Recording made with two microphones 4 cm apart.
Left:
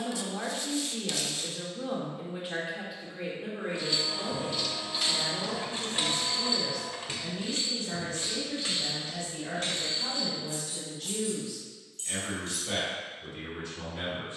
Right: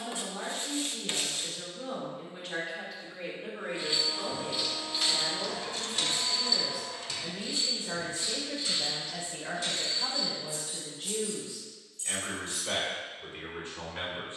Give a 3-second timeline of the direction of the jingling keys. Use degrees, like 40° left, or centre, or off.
off, centre, 40° left, 60° left, 70° left.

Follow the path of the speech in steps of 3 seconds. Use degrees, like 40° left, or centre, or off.
20° left, centre, 20° right, 30° right, 40° right.